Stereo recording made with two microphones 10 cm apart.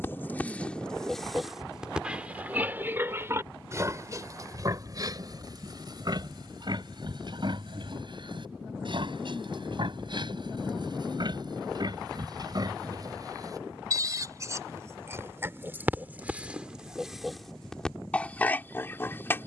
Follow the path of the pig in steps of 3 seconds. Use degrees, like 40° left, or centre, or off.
centre, 40° right, 50° right, 50° right, 40° right, 10° right, 20° left.